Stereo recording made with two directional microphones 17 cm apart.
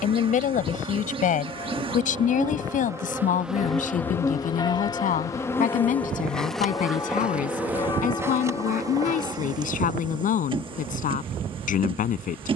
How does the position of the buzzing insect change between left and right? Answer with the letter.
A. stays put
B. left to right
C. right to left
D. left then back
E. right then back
D.